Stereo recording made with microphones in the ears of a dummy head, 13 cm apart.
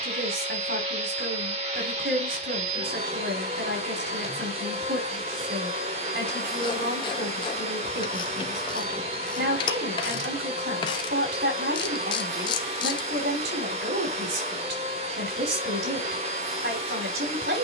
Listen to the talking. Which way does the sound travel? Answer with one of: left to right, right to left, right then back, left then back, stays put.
stays put.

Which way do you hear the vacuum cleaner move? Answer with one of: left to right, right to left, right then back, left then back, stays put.
stays put.